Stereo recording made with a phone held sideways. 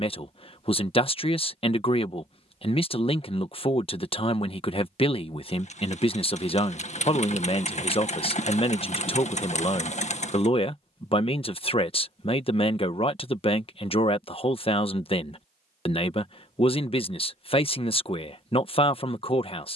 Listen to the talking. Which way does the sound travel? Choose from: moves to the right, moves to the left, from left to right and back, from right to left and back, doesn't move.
doesn't move.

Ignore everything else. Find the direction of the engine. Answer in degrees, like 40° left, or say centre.
40° left.